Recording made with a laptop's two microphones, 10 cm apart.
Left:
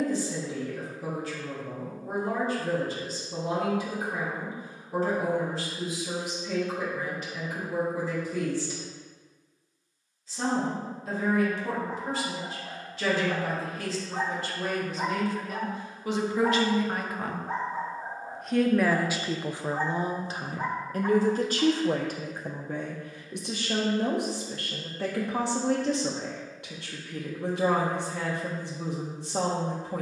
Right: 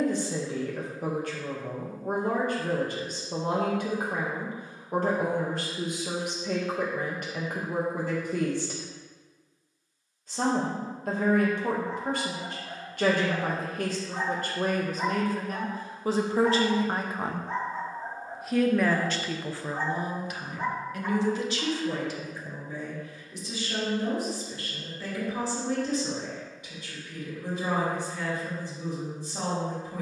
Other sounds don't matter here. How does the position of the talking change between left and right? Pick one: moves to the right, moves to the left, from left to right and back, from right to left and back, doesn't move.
moves to the left.